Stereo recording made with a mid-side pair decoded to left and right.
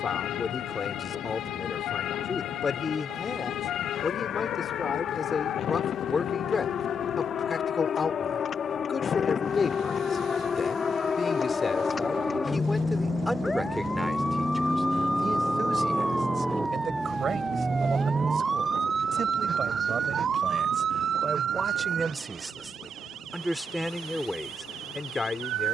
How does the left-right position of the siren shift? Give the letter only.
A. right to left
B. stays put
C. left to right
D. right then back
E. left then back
C.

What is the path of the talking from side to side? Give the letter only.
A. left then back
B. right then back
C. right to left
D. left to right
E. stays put
B.